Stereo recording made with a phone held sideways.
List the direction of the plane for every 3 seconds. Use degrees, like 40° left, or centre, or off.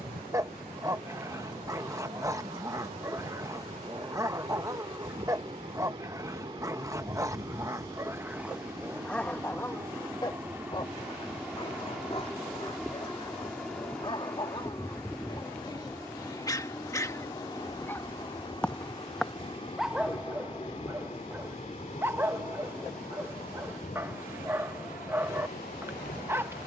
40° right, 40° right, 30° right, 10° right, centre, 20° left, 30° left, 40° left, 50° left.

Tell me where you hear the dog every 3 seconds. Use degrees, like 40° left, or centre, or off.
20° right, 20° right, 20° right, 20° left, 30° left, 20° left, centre, 10° right, 10° right.